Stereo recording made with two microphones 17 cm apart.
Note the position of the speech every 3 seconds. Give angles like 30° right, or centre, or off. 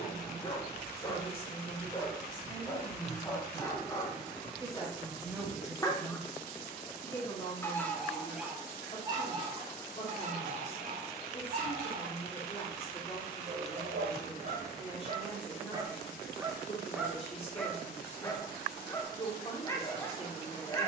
30° left, centre, 20° left, 40° left, 40° left, 40° left, 40° left.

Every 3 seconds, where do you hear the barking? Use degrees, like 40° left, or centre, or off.
20° left, 20° left, centre, 40° right, 50° right, 10° right, 20° left.